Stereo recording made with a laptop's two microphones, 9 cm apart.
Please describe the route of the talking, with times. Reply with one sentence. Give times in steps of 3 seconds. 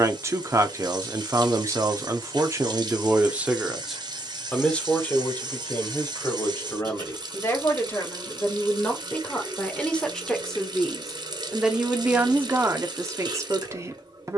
You can hear the talking on the right from 0 s, in the centre from 3 s, on the left from 6 s, in the centre from 9 s and on the right from 12 s.